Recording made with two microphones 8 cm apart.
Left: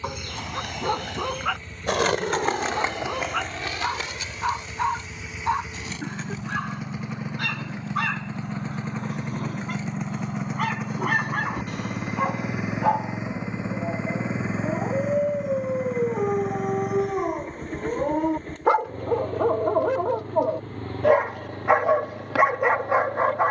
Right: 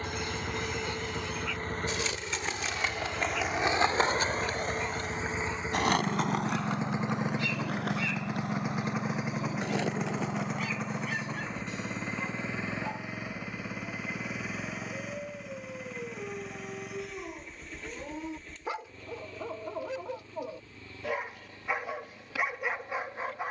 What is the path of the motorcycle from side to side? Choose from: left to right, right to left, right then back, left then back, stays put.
right to left.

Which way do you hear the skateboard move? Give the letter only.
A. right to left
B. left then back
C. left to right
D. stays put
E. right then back
C.